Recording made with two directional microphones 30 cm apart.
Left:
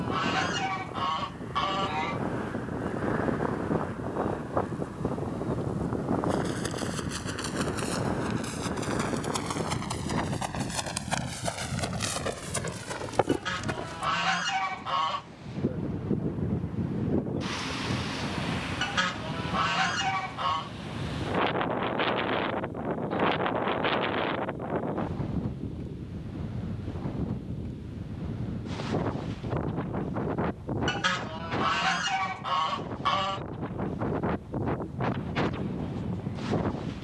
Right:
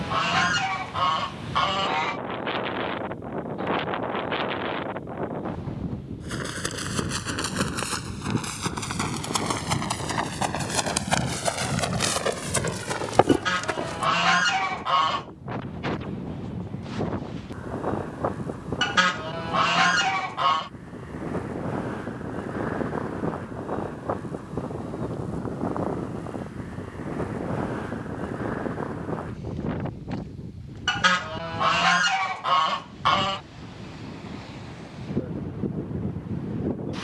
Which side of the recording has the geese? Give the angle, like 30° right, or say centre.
30° right.